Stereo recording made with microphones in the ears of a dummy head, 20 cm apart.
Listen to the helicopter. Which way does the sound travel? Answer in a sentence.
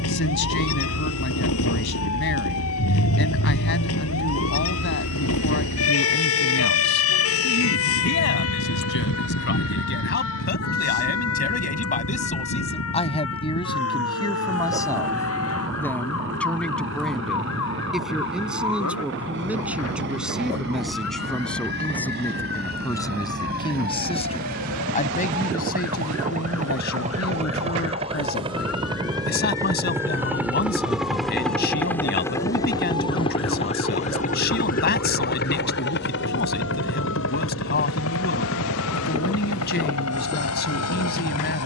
You can hear the helicopter travel towards the left.